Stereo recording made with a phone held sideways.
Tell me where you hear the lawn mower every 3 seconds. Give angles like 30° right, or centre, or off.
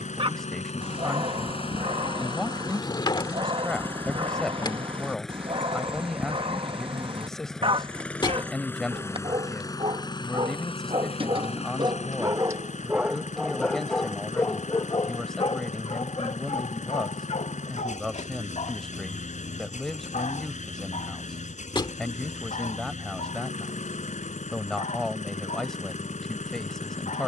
50° left, 10° left, centre, 40° left, 60° left, 60° left, 60° left, 60° left, 60° left.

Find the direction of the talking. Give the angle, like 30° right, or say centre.
centre.